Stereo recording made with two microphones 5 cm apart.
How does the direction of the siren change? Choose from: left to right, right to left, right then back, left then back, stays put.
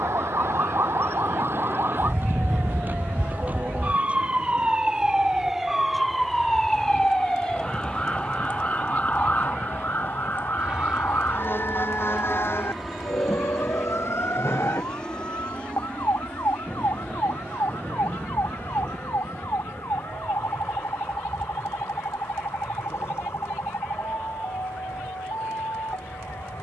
right to left.